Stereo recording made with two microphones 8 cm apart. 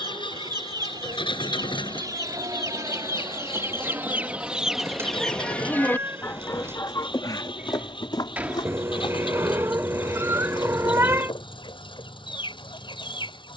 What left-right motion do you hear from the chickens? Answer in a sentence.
You can hear the chickens go from the right side to the left.